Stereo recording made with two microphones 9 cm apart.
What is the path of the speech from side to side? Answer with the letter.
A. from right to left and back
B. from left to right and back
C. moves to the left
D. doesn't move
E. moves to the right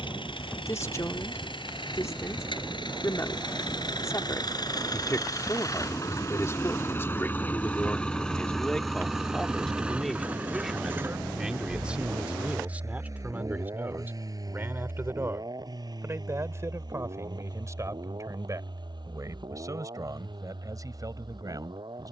E.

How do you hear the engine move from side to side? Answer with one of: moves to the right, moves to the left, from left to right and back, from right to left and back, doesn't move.
moves to the right.